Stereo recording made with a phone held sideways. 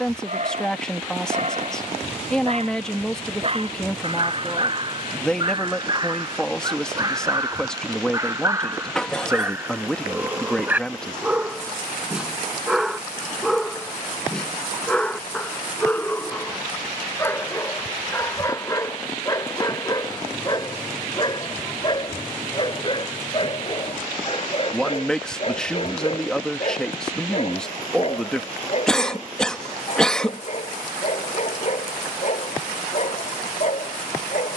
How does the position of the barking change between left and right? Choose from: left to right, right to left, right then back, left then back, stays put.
right to left.